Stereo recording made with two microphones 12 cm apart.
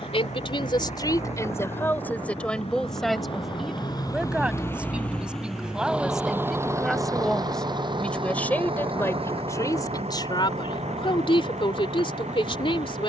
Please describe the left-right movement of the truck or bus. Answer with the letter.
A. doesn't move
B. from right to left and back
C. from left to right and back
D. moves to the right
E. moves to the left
D.